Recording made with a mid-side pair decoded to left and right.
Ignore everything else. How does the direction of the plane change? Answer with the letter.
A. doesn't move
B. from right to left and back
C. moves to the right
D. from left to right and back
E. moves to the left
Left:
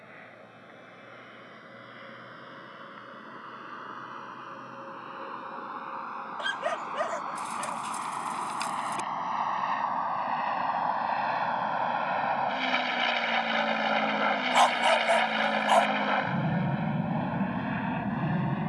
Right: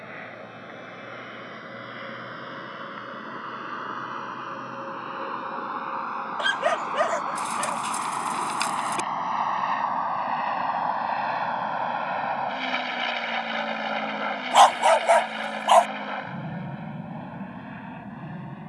E.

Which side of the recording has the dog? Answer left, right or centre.
right.